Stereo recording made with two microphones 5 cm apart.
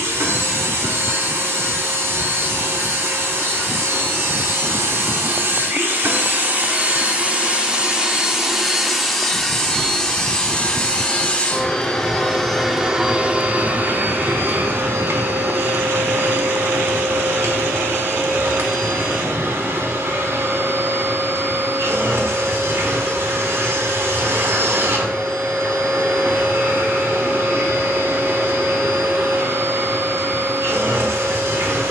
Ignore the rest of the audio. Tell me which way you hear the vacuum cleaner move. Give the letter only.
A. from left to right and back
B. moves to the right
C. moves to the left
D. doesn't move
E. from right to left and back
E.